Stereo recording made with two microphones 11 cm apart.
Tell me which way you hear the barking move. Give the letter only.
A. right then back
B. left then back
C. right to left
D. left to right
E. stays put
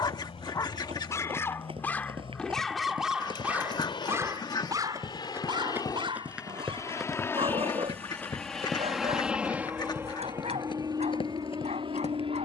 D.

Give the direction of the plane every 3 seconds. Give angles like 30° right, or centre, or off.
60° left, 50° left, 20° left, 30° right.